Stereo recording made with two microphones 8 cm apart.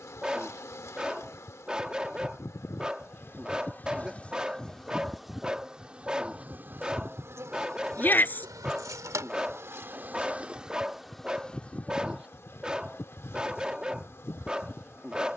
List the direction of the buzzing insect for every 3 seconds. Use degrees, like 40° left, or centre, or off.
40° left, 10° left, 30° right, 10° right, 30° left.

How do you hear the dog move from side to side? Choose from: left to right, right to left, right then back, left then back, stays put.
stays put.